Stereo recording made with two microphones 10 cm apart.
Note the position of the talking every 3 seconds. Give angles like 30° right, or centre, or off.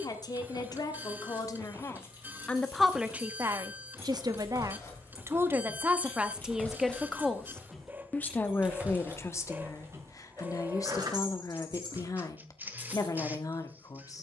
30° left, 30° right, 10° left, 30° left, 40° left.